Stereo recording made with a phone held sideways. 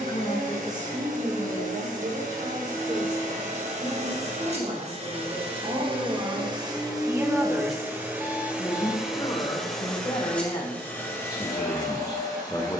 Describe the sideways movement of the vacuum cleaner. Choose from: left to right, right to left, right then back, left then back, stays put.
right to left.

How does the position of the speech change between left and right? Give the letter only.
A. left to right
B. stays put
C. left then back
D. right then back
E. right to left
D.